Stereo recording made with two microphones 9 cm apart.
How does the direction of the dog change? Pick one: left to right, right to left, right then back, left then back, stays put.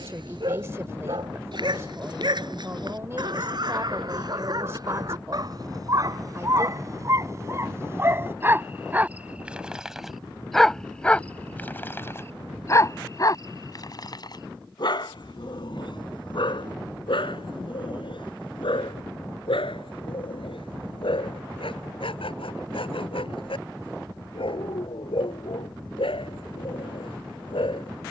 right to left.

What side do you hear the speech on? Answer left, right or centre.
right.